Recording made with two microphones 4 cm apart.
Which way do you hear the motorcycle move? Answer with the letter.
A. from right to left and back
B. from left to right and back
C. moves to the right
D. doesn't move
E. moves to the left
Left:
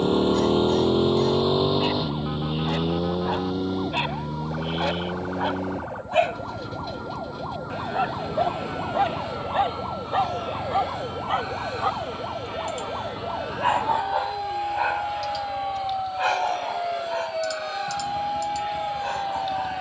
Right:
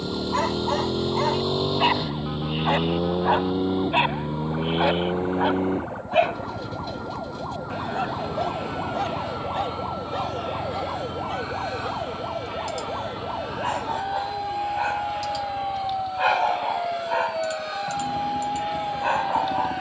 C.